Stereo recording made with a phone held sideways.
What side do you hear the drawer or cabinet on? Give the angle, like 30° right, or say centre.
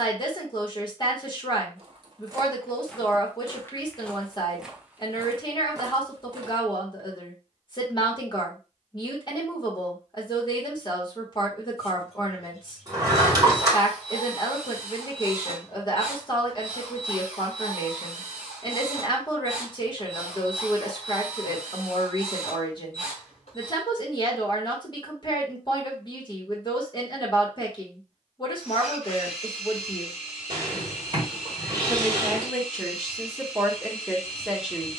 30° right.